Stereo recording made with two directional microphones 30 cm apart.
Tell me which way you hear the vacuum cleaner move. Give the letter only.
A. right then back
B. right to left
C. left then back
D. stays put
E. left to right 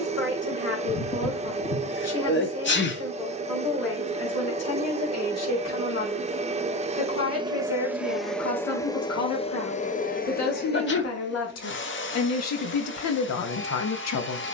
B.